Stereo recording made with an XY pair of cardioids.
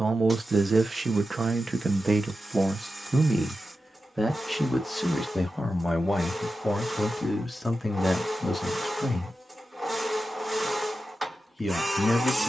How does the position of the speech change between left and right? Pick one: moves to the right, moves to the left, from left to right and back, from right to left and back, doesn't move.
moves to the left.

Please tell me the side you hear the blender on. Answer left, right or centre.
centre.